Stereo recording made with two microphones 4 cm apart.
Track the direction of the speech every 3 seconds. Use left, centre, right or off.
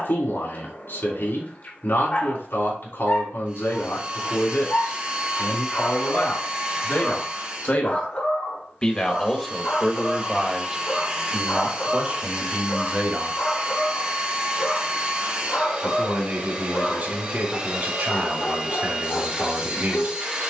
left, left, left, centre, right, right, right.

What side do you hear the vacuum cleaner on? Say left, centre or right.
right.